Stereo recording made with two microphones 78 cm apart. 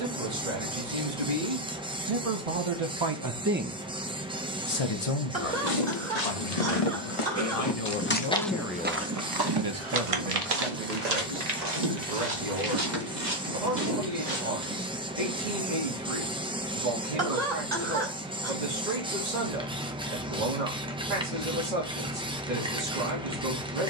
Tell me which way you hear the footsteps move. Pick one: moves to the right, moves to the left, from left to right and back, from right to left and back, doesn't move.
moves to the right.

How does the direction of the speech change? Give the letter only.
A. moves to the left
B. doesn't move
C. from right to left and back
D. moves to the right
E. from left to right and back
C.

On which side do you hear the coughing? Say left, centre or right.
right.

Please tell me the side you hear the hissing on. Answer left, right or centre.
centre.